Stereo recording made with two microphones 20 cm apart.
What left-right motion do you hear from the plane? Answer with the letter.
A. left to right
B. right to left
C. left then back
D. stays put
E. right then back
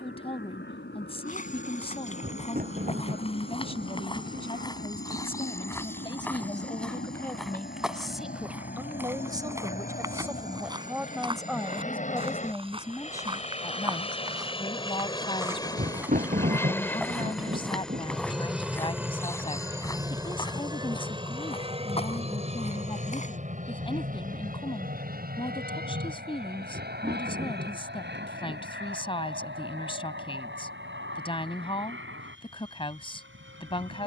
A.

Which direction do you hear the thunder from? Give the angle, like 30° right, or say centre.
40° right.